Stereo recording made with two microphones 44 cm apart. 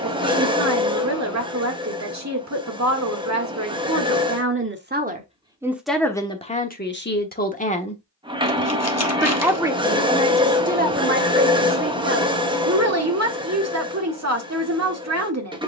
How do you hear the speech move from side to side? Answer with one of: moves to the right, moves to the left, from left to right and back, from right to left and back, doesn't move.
from right to left and back.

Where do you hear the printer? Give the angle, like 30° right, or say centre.
10° right.